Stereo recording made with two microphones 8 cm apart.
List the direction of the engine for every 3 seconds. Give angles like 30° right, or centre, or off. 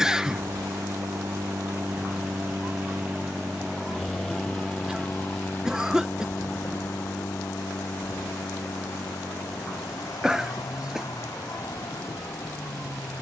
40° right, 10° left, 40° left, 60° left, 60° left.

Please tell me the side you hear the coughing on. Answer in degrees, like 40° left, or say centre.
10° right.